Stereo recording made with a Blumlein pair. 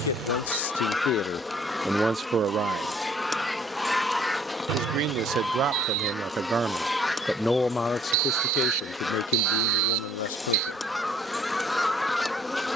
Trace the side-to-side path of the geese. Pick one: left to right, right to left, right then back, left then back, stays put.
stays put.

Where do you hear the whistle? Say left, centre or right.
right.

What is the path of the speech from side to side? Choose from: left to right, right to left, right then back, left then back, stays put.
right then back.